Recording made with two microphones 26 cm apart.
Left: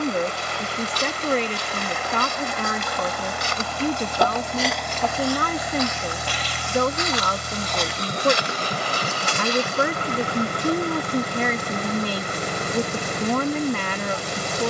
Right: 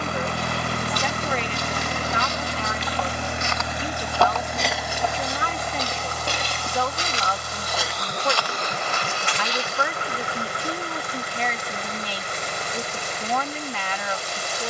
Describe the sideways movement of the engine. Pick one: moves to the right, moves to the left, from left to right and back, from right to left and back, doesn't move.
moves to the left.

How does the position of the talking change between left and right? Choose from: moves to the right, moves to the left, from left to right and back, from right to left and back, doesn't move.
doesn't move.